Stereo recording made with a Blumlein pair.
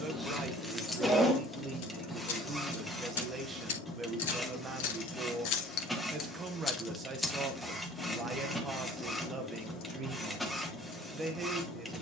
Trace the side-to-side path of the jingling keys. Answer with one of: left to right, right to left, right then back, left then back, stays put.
left then back.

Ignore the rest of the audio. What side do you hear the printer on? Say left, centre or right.
centre.